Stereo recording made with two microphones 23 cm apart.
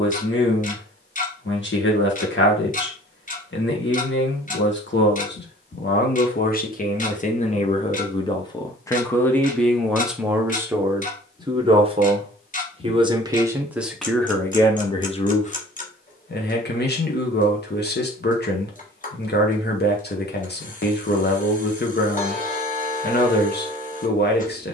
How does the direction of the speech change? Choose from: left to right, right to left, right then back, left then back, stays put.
right then back.